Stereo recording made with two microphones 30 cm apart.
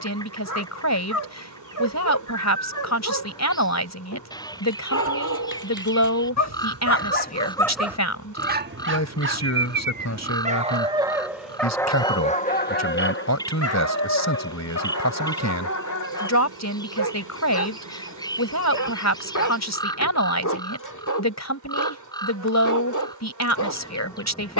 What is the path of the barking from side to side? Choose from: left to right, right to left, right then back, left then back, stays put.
right then back.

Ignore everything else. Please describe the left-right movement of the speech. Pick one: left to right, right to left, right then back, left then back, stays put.
stays put.